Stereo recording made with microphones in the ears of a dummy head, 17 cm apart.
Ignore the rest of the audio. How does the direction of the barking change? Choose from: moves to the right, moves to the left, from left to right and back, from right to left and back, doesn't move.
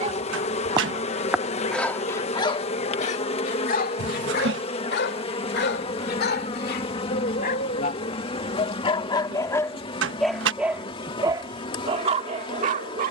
from right to left and back.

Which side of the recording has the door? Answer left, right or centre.
right.